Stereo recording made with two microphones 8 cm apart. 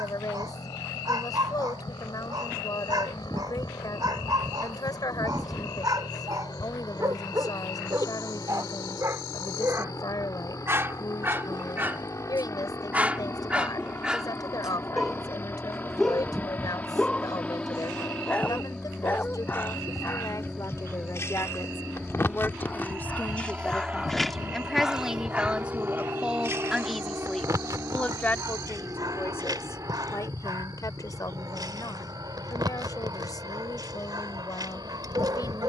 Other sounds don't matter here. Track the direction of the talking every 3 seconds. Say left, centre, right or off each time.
left, left, left, left, left, left, left, left, centre, left, left, left.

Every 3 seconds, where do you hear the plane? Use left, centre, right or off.
left, left, left, left, left, left, centre, centre, right, right, right, right.